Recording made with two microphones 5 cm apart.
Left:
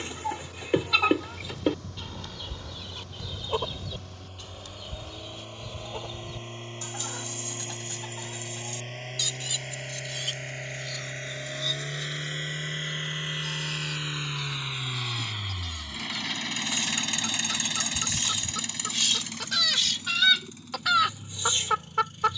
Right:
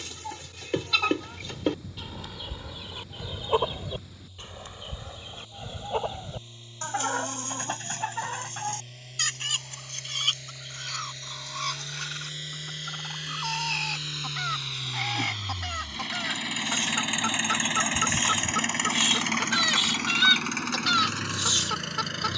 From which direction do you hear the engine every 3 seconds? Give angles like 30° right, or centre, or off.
50° left, 50° left, 50° left, 40° left, 30° left, 10° right, 50° right, 80° right.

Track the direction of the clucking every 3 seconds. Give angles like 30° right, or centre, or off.
centre, 30° right, 50° right, 50° right, 60° right, 50° right, 20° right, 20° left.